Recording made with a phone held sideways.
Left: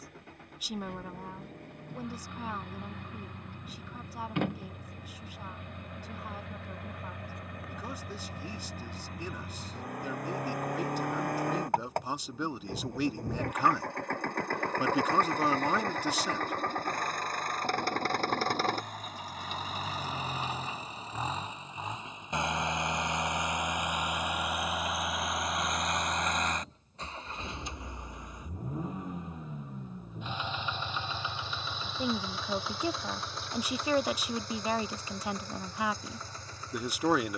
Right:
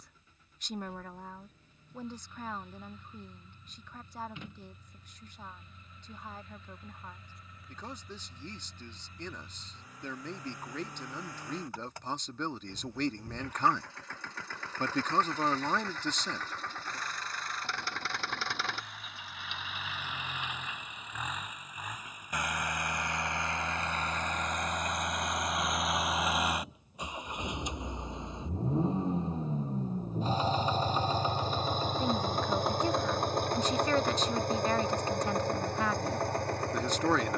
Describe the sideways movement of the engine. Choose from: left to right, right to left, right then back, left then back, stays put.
left to right.